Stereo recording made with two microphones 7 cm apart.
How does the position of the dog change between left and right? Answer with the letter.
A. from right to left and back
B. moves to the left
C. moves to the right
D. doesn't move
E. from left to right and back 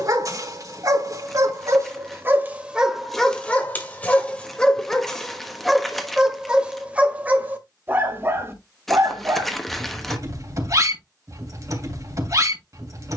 A.